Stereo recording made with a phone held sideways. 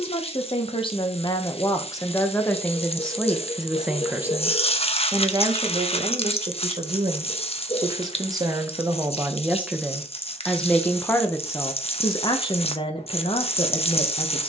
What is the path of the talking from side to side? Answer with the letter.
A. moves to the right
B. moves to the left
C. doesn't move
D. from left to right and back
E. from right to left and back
D.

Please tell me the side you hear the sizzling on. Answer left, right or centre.
left.